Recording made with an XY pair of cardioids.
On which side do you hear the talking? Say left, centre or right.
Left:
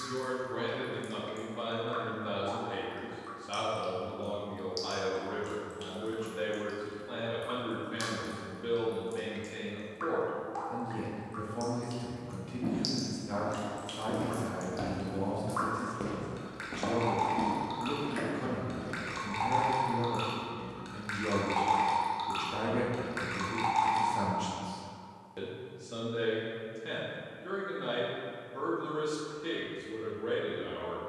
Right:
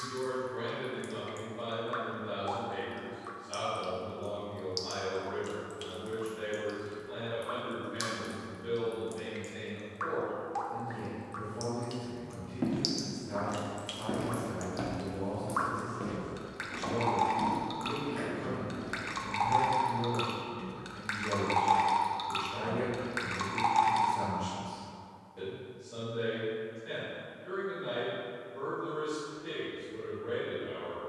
left.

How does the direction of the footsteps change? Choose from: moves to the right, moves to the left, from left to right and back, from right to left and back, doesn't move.
moves to the left.